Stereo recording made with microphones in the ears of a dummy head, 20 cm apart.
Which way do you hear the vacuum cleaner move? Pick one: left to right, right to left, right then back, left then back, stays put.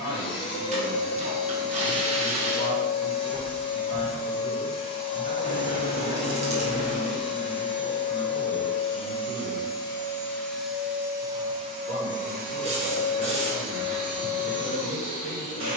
left to right.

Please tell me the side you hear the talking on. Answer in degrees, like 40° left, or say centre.
60° right.